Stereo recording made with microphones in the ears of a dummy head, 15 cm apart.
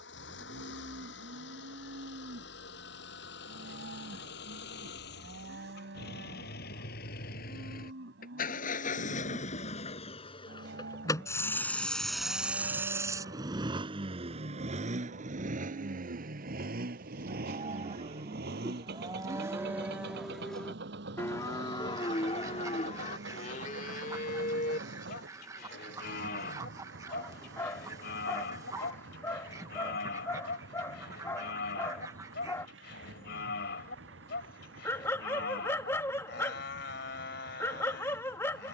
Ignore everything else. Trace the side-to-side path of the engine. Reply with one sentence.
In this clip you hear the engine travel towards the right.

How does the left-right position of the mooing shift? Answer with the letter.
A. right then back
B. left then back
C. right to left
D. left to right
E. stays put
C.